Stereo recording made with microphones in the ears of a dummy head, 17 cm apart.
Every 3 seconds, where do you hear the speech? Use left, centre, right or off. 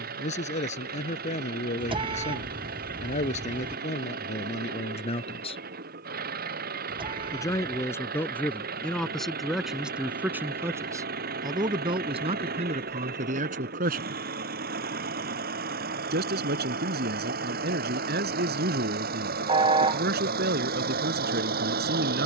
left, left, centre, centre, right, right, right, right.